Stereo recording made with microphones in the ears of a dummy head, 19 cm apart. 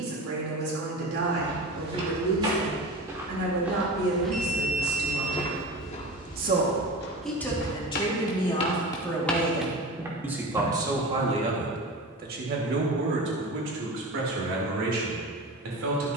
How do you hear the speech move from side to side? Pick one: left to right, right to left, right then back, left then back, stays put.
left then back.